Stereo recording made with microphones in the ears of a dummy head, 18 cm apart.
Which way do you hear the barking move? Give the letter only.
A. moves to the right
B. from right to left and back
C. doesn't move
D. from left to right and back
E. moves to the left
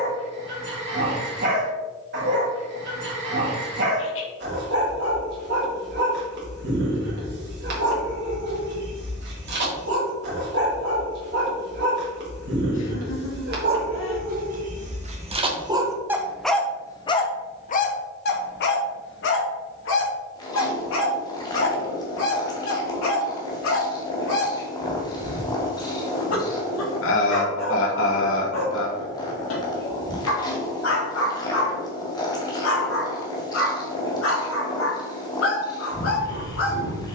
E.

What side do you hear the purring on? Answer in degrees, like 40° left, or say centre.
20° left.